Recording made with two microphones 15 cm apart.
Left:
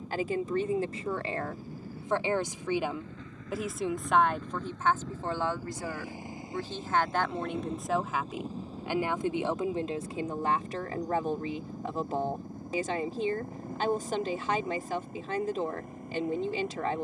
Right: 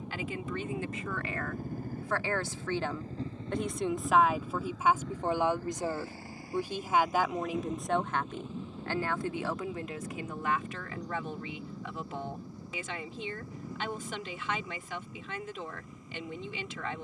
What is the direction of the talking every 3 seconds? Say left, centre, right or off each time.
left, centre, centre, left, left, left.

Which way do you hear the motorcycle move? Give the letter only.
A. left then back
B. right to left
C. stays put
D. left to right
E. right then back
B.